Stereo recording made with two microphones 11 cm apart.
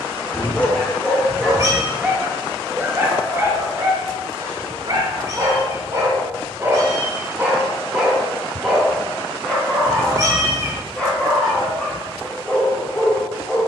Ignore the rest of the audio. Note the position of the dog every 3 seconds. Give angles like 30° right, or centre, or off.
centre, 30° right, 10° right, 10° left, 10° left.